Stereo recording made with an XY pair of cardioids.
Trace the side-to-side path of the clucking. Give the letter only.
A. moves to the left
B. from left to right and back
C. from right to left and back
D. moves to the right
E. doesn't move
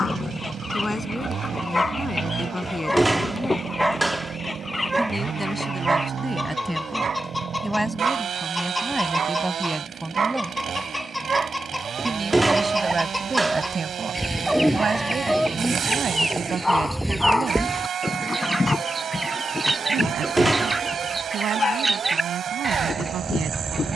D.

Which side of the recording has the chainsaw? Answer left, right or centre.
right.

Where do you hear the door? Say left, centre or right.
centre.